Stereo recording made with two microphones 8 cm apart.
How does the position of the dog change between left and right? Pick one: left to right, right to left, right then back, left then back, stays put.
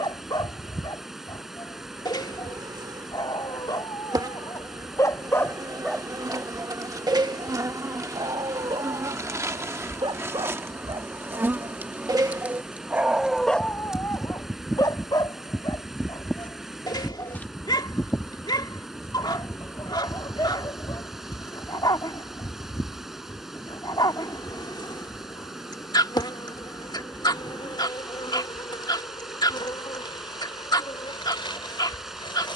right then back.